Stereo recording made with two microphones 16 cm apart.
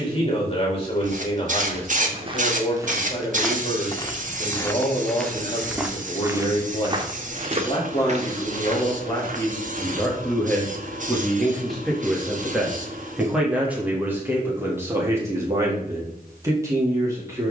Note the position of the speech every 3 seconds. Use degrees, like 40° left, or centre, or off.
30° left, 30° left, 30° left, 10° left, 10° right, 20° right.